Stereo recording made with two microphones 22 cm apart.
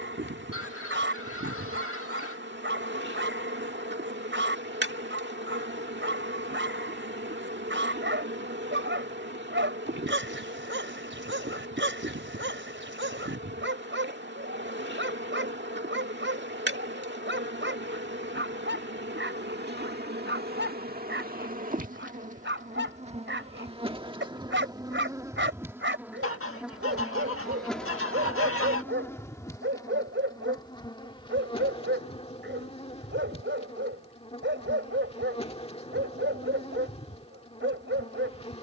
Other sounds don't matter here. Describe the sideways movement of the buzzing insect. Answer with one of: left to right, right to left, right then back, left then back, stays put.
right to left.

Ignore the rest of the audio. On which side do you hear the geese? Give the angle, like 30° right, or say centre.
70° left.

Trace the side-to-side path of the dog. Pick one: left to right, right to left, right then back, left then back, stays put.
stays put.